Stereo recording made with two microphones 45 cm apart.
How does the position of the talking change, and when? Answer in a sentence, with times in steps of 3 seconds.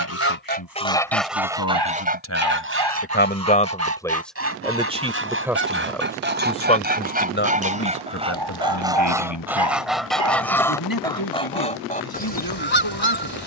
In this clip you hear the talking on the left from 0 s, in the centre from 3 s and on the left from 6 s.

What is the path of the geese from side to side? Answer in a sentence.
In this clip you hear the geese move from left to right and back again.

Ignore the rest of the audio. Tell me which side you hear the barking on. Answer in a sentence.
You can hear the barking on the right.